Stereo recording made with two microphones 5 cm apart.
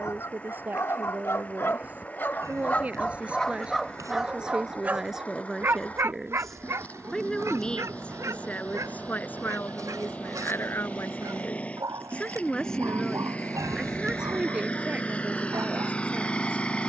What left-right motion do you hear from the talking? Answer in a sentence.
In this clip you hear the talking go left and come back.